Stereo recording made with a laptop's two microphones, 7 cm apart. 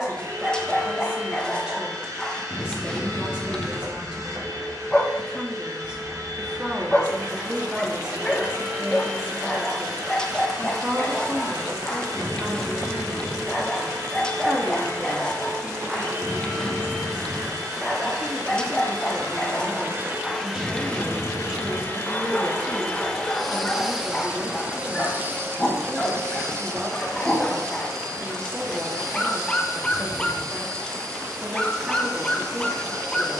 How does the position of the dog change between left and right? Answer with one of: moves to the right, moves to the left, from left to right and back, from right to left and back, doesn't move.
doesn't move.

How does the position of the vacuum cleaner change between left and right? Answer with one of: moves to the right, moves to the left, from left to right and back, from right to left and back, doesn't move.
from right to left and back.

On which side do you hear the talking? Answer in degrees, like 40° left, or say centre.
10° right.